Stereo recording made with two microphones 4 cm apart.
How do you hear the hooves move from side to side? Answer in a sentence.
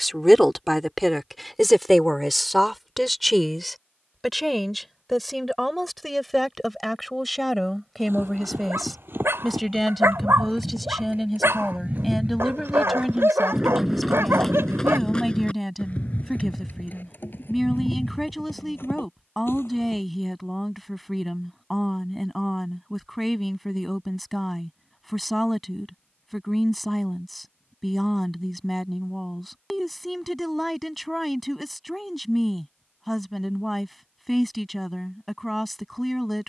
In this clip you hear the hooves go from the right side to the left.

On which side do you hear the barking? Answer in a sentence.
In this clip you hear the barking on the right.